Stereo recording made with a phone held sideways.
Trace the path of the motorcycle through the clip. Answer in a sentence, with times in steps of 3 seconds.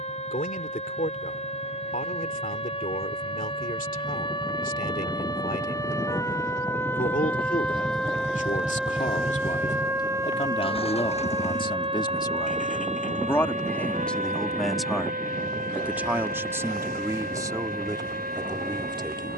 In this clip you hear the motorcycle on the right from 0 s and on the left from 9 s.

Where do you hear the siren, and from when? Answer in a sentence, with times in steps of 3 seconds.
You can hear the siren on the left from 0 s, in the centre from 6 s and on the right from 9 s.